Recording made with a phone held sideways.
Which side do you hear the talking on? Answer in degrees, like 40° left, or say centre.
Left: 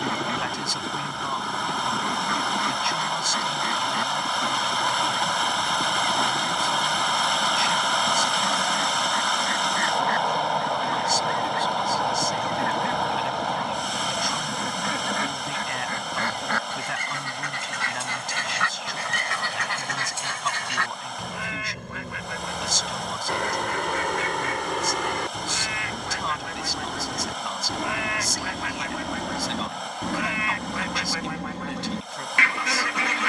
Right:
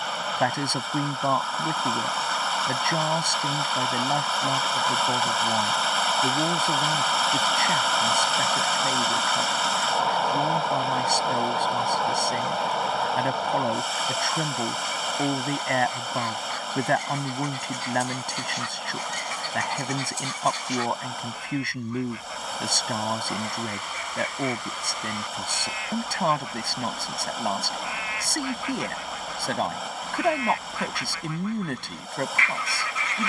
50° right.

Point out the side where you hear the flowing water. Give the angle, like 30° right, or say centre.
centre.